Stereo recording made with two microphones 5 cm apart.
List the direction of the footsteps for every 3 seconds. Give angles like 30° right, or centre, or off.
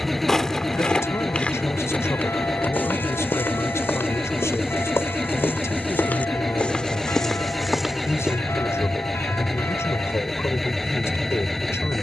30° left, 50° left, 10° left, off.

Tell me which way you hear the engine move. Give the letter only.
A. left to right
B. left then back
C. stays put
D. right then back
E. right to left
C.